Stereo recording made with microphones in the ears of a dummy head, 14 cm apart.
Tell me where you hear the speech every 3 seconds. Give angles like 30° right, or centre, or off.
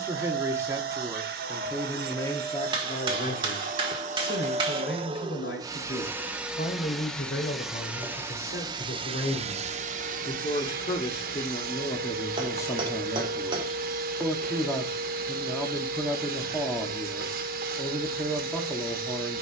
centre, 70° left, 60° left, 40° left, 10° left, centre, centre.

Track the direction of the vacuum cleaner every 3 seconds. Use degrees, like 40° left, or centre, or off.
70° right, 40° right, 10° right, 50° right, 60° right, 60° right, 60° right.